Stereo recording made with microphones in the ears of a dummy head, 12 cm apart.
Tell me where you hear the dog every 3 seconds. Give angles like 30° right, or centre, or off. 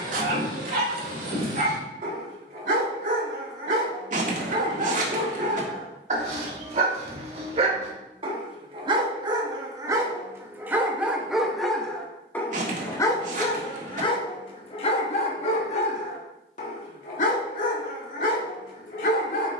70° right, 60° right, 50° right, 20° right, 30° left, 60° left, 70° left.